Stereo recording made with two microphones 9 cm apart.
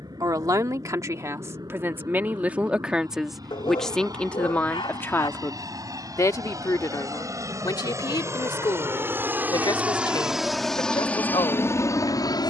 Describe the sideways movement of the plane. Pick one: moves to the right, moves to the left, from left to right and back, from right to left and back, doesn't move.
moves to the left.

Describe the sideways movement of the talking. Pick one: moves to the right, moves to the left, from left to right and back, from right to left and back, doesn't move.
moves to the left.